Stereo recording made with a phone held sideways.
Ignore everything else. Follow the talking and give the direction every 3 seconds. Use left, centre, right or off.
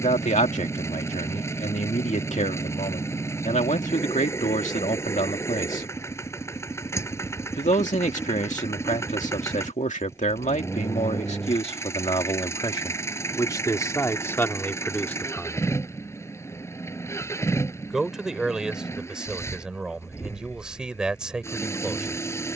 left, left, left, left, left, centre, centre, centre.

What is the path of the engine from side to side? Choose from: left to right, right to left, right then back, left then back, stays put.
stays put.